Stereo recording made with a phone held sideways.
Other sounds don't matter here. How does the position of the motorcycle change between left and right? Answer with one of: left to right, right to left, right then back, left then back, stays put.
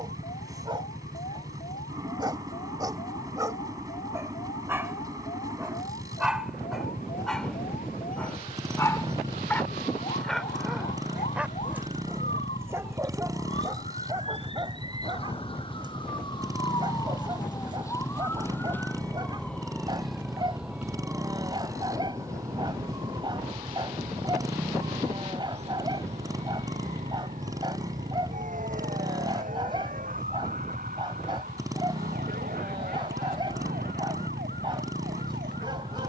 stays put.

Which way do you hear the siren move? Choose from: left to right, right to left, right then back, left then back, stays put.
left to right.